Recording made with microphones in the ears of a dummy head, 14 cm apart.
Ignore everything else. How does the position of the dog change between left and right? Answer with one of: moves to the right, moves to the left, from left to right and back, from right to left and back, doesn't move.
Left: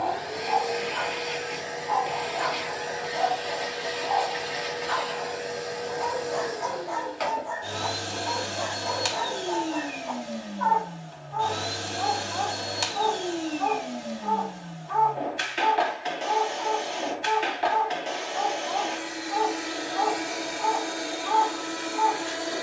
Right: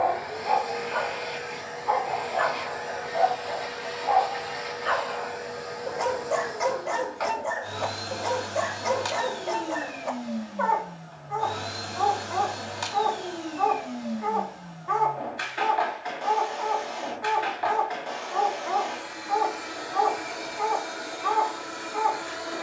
doesn't move.